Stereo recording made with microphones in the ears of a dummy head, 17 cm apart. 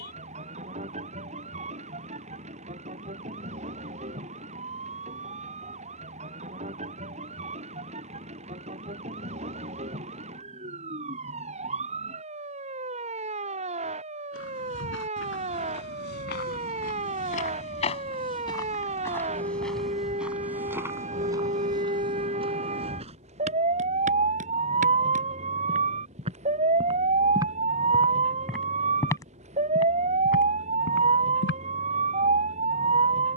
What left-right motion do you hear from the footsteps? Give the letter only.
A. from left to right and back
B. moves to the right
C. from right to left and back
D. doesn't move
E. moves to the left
A.